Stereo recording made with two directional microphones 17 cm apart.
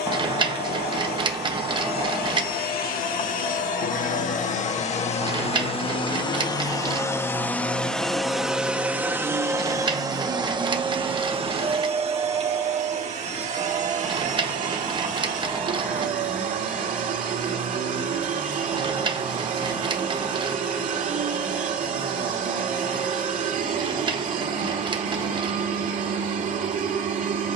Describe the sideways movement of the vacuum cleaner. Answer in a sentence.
You can hear the vacuum cleaner travel towards the right.